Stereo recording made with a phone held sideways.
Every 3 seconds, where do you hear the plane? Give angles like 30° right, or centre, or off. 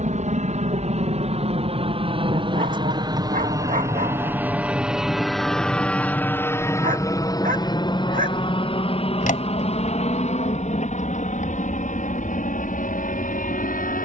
40° right, 10° right, 20° left, 40° left, 50° left.